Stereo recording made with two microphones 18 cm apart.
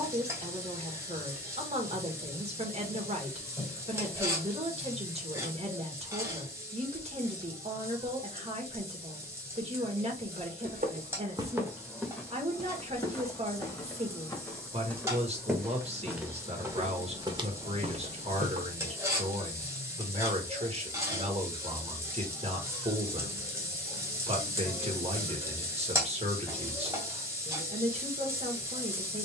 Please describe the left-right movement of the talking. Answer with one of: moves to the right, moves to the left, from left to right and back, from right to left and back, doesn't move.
doesn't move.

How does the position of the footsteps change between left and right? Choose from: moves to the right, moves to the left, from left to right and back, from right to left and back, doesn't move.
from right to left and back.